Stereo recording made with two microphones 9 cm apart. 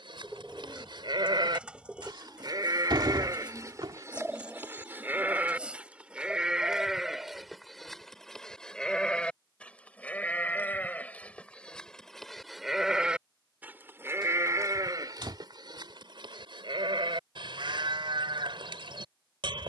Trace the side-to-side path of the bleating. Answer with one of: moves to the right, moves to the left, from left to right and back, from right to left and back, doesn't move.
from right to left and back.